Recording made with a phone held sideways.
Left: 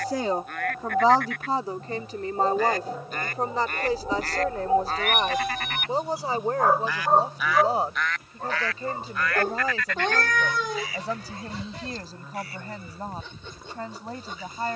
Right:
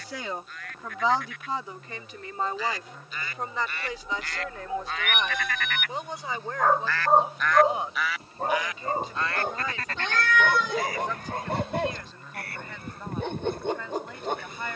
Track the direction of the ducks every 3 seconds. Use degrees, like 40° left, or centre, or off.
60° left, 40° left, 10° left, 50° right, 60° right.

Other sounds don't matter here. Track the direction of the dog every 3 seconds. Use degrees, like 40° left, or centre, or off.
60° left, 50° left, 20° right, 60° right, 60° right.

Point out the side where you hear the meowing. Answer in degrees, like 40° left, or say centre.
50° left.